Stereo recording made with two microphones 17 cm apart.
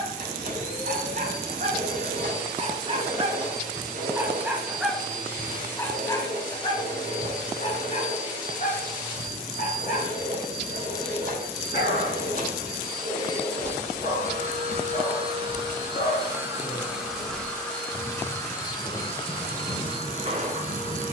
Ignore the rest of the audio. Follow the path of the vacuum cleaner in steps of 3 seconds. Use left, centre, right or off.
right, right, right, right, right, centre, left.